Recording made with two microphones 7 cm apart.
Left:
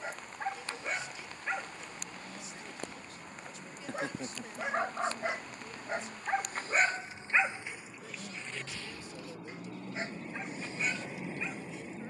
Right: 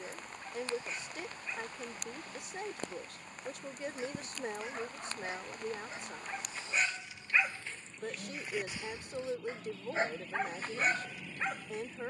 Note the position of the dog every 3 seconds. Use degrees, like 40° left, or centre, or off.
80° left, 70° left, 20° left, 40° right.